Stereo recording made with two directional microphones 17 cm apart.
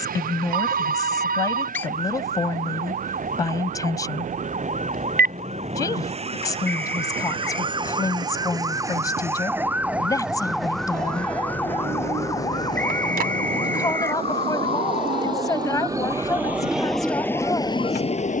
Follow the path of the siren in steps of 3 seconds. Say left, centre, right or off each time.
right, right, right, centre, left, left.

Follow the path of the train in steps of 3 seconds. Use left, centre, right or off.
right, right, right, right, right, centre.